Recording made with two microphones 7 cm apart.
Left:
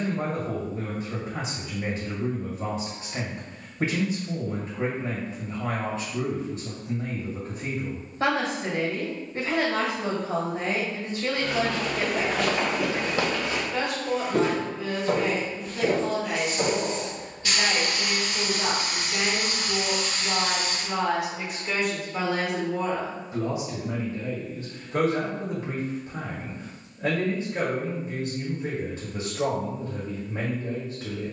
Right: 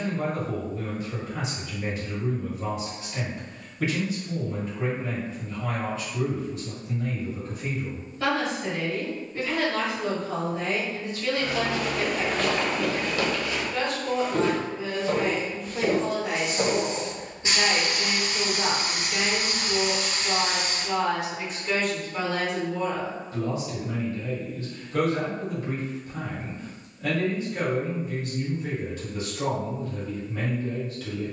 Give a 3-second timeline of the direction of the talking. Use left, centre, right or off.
left, left, left, left, centre, right, centre, centre, left, left, left.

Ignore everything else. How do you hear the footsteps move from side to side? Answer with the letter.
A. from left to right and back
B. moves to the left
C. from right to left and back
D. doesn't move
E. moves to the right
C.